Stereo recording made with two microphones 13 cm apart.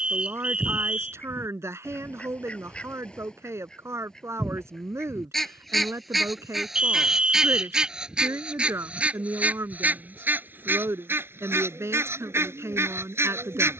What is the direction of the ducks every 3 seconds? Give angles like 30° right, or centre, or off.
10° left, centre, centre, 10° right, 20° right.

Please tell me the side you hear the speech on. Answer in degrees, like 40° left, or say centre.
20° right.